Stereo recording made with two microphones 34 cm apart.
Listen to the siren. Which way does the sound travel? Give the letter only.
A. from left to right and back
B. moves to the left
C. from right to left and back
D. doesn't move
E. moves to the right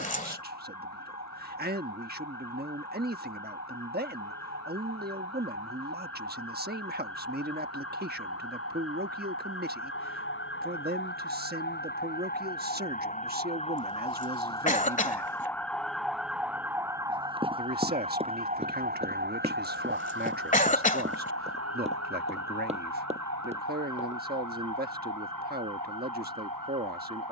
E.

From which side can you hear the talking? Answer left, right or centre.
right.